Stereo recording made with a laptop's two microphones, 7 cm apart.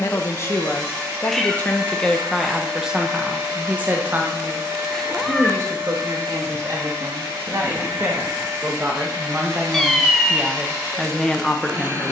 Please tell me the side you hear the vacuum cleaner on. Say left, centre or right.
right.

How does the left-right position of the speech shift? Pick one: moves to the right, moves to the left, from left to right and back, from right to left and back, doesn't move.
from left to right and back.